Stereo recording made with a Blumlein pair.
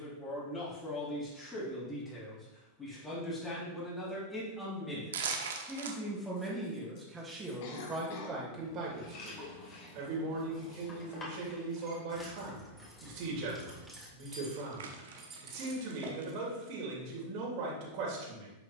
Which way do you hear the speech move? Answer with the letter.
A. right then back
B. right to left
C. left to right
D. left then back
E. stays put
C.